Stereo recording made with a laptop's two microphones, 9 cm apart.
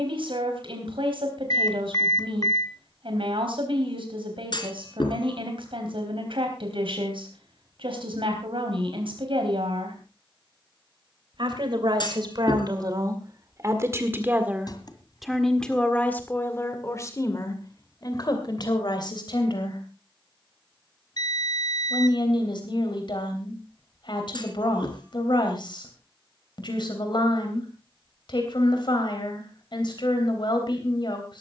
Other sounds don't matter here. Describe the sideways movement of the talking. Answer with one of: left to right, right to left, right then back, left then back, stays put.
right to left.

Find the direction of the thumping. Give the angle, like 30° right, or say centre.
50° left.